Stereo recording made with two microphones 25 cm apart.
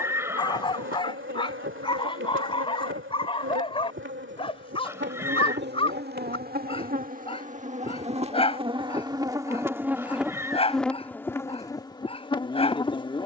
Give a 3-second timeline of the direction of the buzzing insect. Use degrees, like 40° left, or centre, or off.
50° right, 50° right, 30° right, centre, 20° left.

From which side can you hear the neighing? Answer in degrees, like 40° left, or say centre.
10° right.